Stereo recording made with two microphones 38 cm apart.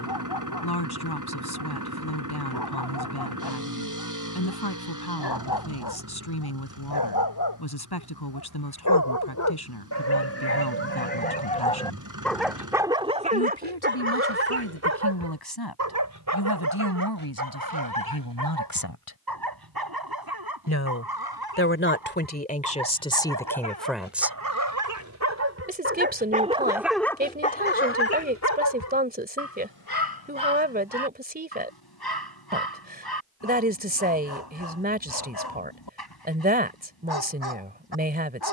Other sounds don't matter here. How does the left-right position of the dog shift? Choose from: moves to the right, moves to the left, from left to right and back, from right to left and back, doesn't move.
from left to right and back.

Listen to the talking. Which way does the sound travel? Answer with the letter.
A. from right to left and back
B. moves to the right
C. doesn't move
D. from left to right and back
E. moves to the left
B.